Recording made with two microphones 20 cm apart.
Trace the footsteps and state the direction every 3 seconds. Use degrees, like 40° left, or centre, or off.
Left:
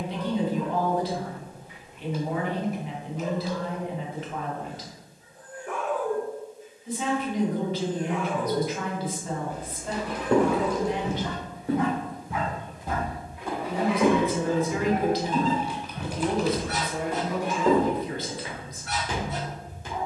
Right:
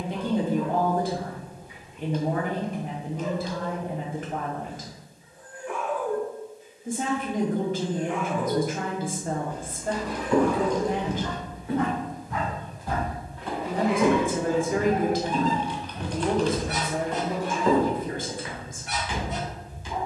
off, off, off, 60° left, 10° left, 10° left, 50° left.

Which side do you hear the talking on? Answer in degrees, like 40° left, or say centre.
50° right.